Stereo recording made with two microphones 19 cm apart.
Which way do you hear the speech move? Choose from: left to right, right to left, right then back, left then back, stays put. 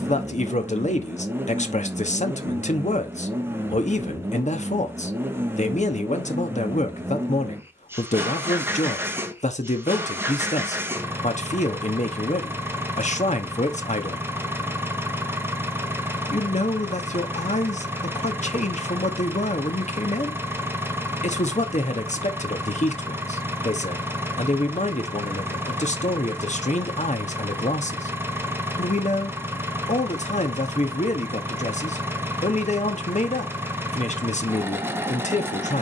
stays put.